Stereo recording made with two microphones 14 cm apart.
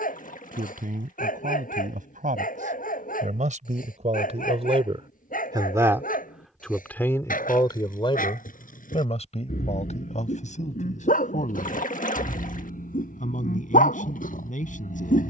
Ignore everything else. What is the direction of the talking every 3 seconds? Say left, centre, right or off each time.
right, right, left, left, left.